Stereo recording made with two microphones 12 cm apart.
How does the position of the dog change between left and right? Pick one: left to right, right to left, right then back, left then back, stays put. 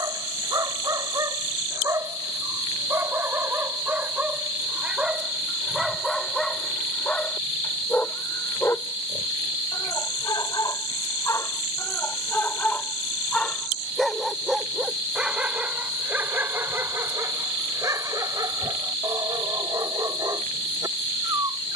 left then back.